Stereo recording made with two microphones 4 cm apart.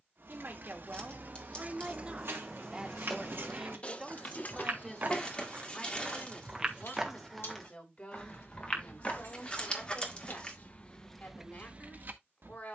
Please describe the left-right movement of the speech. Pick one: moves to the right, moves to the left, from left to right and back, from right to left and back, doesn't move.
moves to the left.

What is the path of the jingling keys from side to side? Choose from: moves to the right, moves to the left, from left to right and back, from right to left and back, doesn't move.
from right to left and back.